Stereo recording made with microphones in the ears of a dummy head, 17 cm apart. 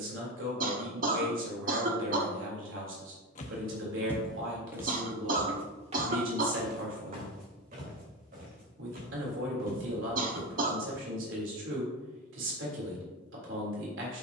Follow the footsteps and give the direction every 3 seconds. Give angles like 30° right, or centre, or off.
off, centre, 50° right, 50° right, off.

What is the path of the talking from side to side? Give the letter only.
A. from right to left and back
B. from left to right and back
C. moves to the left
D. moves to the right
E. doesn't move
E.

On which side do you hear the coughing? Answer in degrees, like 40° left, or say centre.
50° right.